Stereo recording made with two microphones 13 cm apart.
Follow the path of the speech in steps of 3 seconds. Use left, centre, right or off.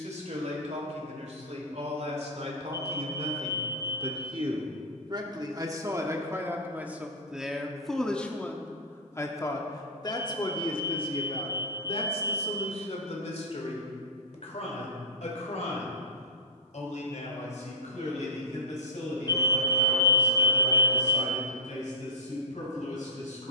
right, right, centre, left, left, left, left, left.